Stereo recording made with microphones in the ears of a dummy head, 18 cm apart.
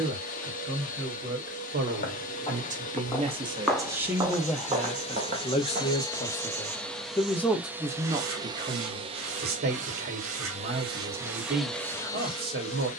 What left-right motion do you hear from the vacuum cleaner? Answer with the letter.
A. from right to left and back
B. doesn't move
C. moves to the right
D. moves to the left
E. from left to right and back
E.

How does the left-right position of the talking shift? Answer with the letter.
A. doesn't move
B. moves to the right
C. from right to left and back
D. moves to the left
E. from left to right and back
C.